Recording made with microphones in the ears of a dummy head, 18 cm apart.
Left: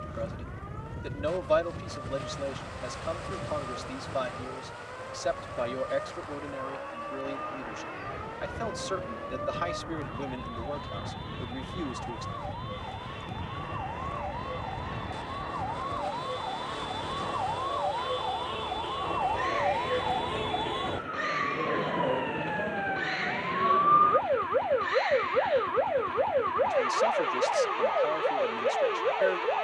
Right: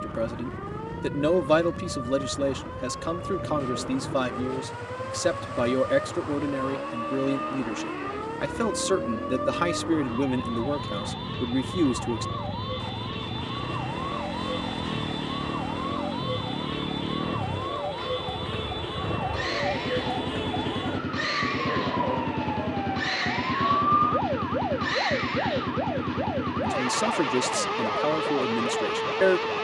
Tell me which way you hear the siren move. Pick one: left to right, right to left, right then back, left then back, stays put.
right to left.